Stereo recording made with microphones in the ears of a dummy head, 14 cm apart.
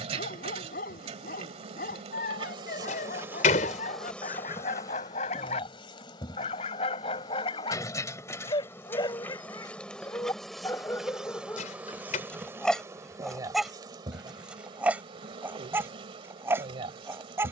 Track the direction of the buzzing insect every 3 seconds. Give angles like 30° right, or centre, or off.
40° right, 10° left, 20° left, centre, 20° right, 40° right.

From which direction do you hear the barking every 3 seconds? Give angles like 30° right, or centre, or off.
60° left, 50° left, 30° left, 20° left, centre, 20° right.